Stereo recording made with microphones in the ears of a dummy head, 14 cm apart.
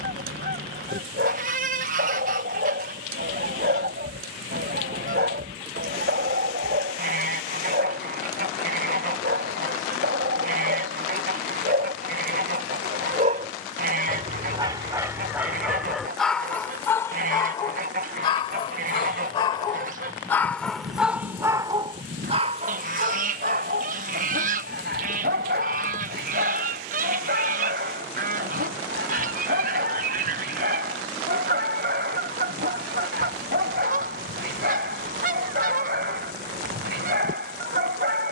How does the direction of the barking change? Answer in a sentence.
In this clip you hear the barking go left and come back.